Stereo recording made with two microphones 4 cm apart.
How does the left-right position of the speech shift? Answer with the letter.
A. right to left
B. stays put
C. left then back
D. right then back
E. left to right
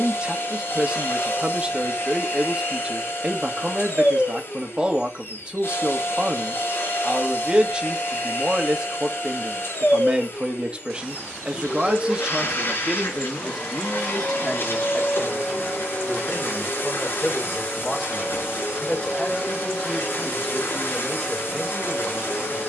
A.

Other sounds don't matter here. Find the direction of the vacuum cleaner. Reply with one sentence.
In this clip you hear the vacuum cleaner on the left.